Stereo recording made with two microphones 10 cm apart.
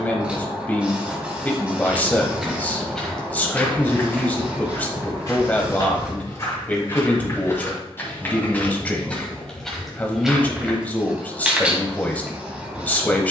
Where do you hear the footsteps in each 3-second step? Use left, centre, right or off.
centre, left, left, centre, off.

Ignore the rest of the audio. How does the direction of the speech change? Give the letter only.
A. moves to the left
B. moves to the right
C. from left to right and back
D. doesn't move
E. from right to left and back
D.